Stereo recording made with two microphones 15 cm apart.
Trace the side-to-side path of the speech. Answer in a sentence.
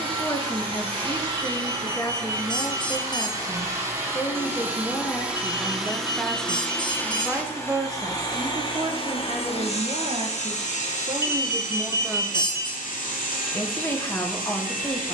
You can hear the speech go right and come back.